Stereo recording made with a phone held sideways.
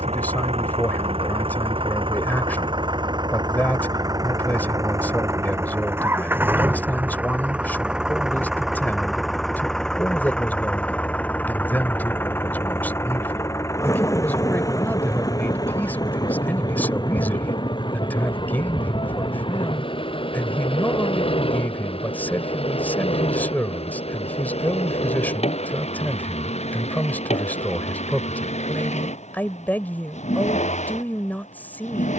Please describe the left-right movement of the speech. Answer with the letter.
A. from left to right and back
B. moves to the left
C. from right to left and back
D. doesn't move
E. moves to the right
D.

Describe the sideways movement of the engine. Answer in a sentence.
In this clip you hear the engine travel towards the left.